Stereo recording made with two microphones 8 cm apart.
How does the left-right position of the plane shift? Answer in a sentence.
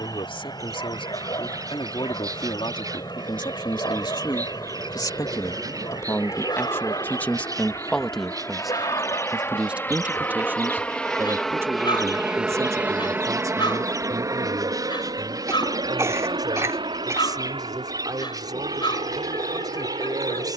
You can hear the plane go from the left side to the right.